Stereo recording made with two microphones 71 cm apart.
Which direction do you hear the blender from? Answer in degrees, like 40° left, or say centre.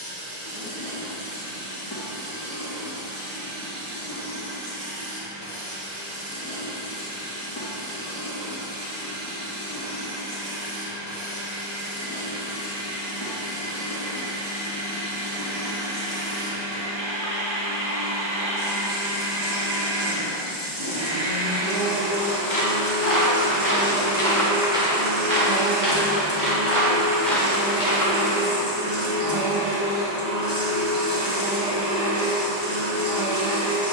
70° right.